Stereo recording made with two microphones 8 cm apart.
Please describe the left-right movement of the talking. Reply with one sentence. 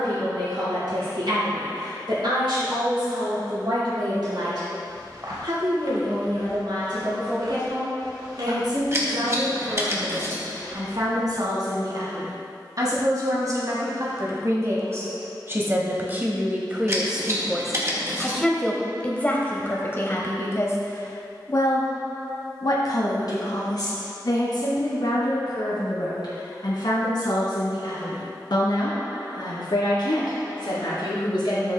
In this clip you hear the talking move from right to left.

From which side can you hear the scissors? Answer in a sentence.
You can hear the scissors on the right.